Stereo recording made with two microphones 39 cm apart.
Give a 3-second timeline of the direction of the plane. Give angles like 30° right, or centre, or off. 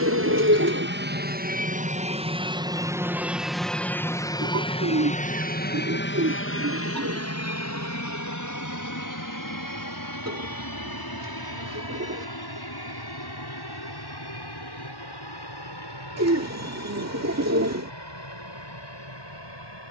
20° right, 10° left, 40° left, 50° left, 60° left, 70° left, 70° left.